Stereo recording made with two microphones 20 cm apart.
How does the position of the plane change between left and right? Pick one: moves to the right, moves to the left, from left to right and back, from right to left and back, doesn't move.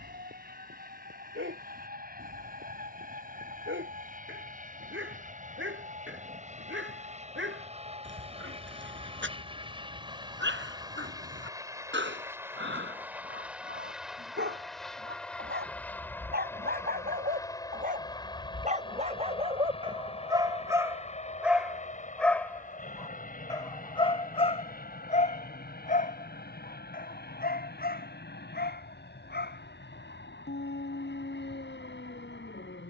moves to the left.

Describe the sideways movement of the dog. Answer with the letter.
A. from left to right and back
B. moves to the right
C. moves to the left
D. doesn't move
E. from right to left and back
C.